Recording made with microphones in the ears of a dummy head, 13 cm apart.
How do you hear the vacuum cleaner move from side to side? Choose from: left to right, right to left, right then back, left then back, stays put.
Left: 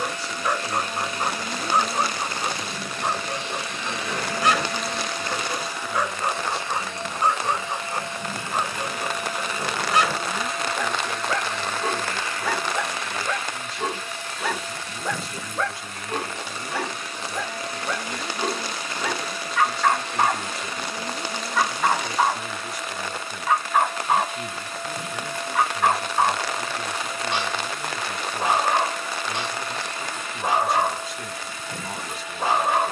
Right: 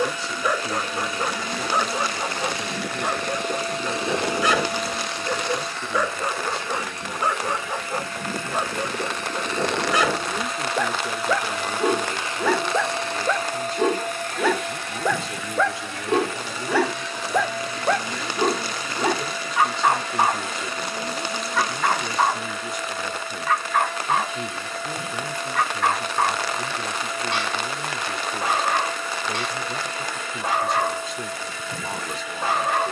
left then back.